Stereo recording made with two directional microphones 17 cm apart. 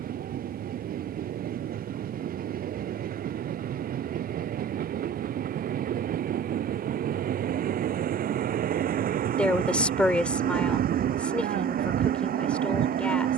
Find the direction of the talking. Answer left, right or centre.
centre.